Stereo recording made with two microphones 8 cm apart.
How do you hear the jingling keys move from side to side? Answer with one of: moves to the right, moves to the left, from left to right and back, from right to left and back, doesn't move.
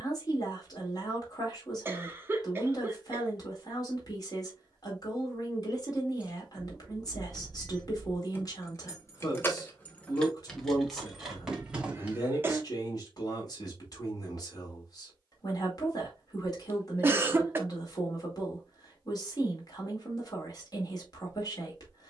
from right to left and back.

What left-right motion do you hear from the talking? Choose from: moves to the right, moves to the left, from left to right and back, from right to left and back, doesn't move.
doesn't move.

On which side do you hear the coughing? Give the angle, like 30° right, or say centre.
30° right.